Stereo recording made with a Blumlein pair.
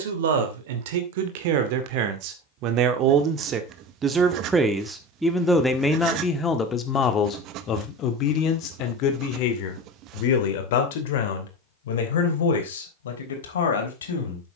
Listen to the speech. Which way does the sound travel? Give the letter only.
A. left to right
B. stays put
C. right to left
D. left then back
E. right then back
C.